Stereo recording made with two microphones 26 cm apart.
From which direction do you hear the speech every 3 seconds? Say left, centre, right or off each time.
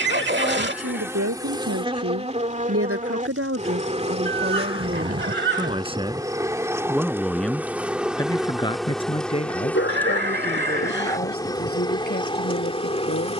right, right, centre, left, left.